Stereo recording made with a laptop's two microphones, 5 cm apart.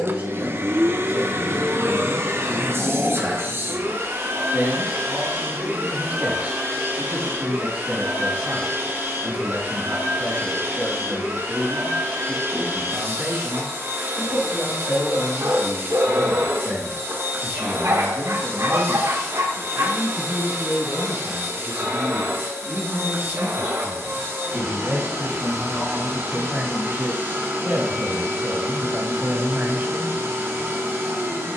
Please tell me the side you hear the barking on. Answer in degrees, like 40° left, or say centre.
50° right.